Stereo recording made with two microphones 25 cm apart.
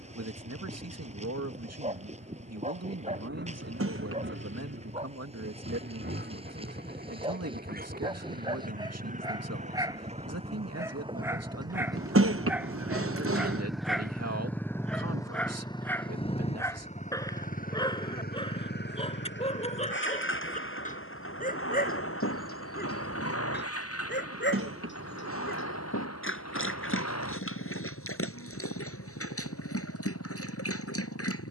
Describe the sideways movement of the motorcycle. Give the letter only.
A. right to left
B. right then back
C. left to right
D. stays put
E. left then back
A.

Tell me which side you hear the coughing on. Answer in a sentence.
In this clip you hear the coughing on the right.